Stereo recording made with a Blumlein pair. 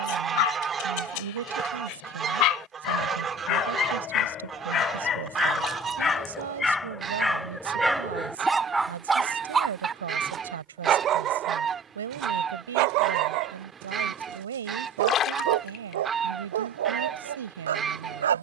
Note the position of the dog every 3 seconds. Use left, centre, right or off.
left, left, centre, right, right, right.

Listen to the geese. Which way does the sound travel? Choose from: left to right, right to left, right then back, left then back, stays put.
stays put.